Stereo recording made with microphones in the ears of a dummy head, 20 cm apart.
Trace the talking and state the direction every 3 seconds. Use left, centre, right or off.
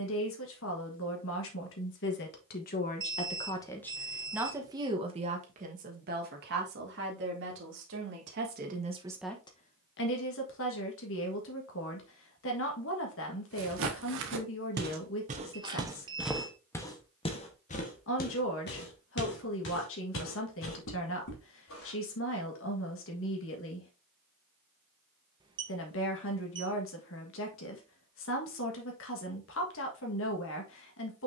left, centre, right, left, left, left, left, left, left, left, left.